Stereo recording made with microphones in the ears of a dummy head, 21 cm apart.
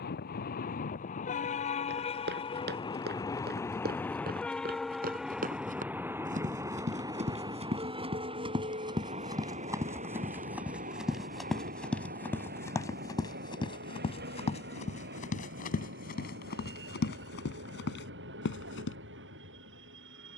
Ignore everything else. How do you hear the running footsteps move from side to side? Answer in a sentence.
You can hear the running footsteps move to the left.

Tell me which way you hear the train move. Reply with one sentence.
In this clip you hear the train move from left to right.